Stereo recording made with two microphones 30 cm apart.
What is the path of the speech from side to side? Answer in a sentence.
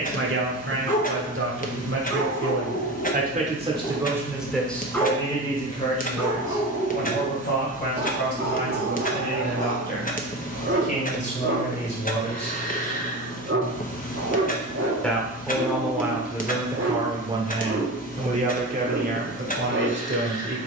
You can hear the speech go left and come back.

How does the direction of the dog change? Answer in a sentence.
In this clip you hear the dog go from the left side to the right.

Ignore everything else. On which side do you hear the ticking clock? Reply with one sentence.
In this clip you hear the ticking clock on the left.